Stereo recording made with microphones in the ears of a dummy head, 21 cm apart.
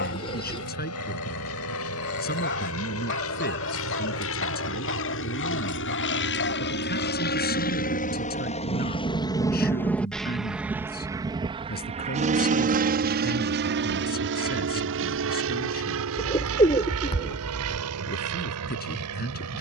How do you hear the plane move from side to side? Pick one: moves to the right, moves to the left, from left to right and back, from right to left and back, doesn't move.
moves to the right.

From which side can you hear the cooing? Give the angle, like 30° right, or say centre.
20° left.